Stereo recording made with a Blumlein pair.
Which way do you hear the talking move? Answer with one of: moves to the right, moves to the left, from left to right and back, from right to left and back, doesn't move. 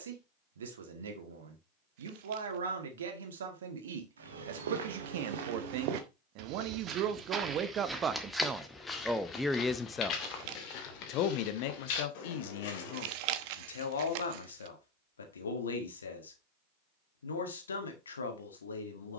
moves to the left.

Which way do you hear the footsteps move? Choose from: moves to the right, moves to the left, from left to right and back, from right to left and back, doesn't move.
moves to the left.